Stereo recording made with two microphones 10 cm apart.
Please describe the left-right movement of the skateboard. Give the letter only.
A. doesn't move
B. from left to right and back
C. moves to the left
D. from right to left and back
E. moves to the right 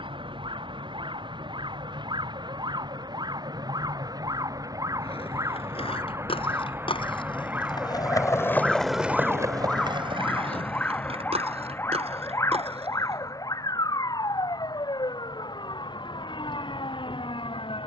E.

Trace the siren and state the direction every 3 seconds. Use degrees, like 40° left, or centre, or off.
50° right, 40° right, 20° right, 10° left, 40° left, 50° left.